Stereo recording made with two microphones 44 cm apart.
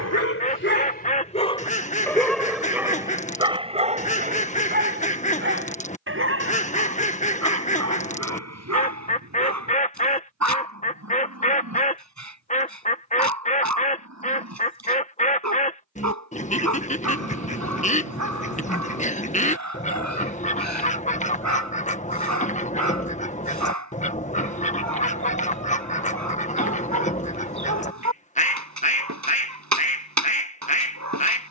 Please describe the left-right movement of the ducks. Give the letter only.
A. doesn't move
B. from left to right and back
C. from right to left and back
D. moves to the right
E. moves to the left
A.